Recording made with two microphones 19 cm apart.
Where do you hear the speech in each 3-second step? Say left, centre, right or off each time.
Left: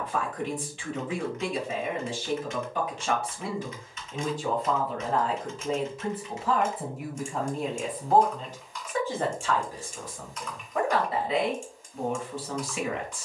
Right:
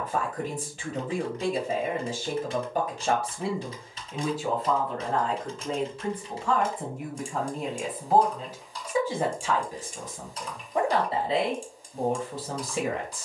right, centre, centre, right, right.